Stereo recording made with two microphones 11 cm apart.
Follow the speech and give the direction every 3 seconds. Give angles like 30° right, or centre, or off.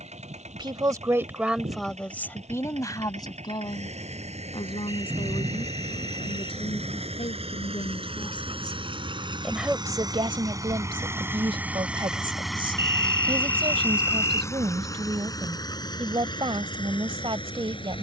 centre, 50° left, 50° left, 40° right, 50° right, 50° right.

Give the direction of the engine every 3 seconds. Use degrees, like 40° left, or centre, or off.
80° right, 70° right, 60° right, 30° right, 10° left, 40° left.